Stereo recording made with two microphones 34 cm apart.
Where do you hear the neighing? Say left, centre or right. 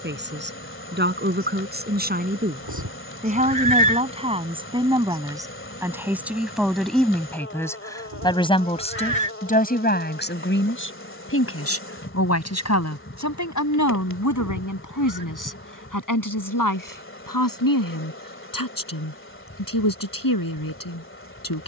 right.